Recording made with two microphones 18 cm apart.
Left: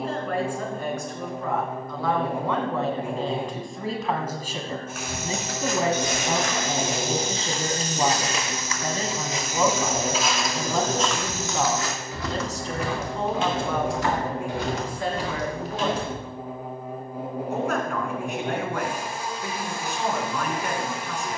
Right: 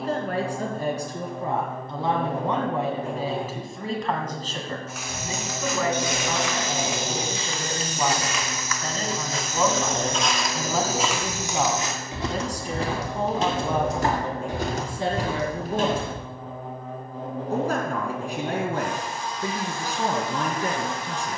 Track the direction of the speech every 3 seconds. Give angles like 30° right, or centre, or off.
30° right, 10° left, 20° left, centre, 20° right, 30° right, 40° right.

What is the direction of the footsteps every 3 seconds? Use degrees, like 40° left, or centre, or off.
off, 60° left, 40° left, centre, 40° right, 60° right, off.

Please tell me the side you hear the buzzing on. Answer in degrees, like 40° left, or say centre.
10° left.